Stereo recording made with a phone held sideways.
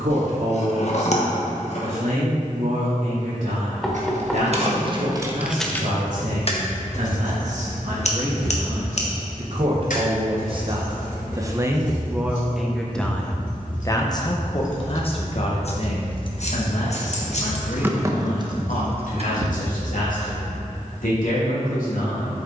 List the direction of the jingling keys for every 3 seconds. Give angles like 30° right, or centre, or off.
off, 30° right, 60° left, 80° left, 70° left, 30° left, 40° right, off.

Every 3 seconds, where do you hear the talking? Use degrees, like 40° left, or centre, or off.
70° right, 70° right, 60° right, 30° right, 10° left, 60° left, 70° left, 80° left.